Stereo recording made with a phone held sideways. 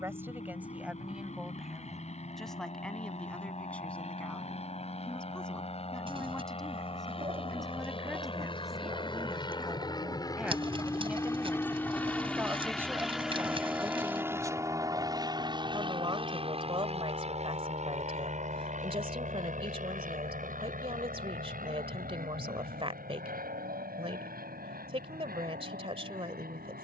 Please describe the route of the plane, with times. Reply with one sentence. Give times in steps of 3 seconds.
You can hear the plane on the left from 0 s, in the centre from 12 s and on the right from 15 s.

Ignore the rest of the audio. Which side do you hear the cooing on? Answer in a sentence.
In this clip you hear the cooing on the right.